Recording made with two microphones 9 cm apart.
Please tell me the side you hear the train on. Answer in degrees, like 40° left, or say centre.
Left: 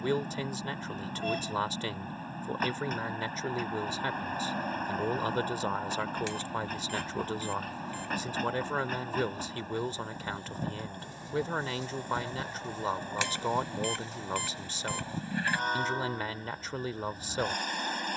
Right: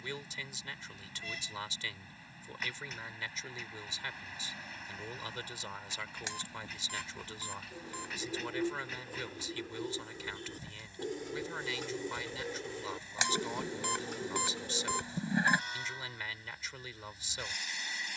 50° left.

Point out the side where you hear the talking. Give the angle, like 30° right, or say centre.
50° left.